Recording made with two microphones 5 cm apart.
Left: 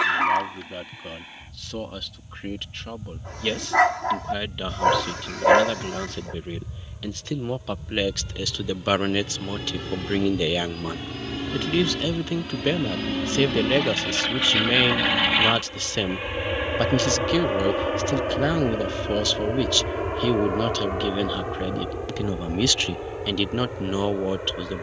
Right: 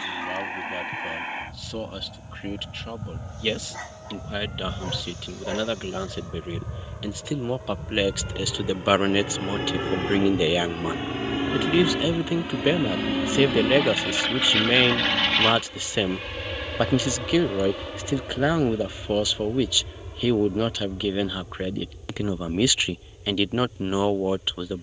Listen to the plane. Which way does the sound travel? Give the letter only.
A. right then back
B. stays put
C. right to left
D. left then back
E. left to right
C.